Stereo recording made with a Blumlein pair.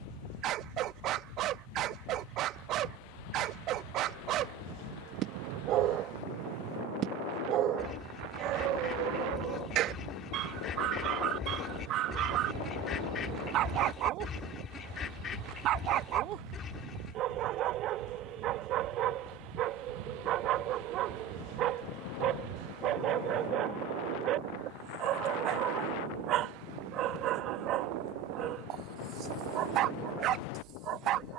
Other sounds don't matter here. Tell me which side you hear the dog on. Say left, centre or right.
right.